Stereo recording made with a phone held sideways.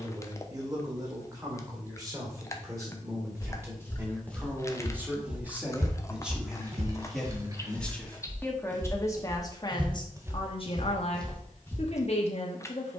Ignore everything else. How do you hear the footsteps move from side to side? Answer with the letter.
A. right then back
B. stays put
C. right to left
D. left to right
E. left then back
A.